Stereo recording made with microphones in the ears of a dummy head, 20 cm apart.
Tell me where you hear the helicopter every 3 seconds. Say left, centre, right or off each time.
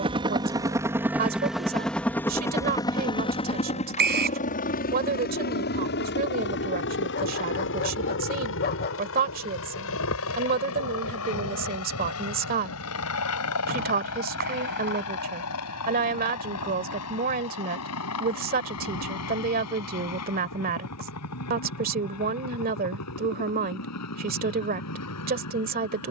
centre, left, left, left, left, left, left, left, left.